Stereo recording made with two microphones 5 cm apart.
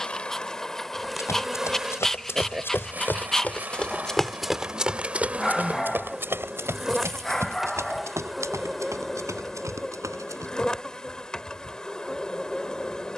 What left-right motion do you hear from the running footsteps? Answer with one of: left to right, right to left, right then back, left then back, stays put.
left to right.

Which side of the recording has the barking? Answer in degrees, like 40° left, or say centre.
10° left.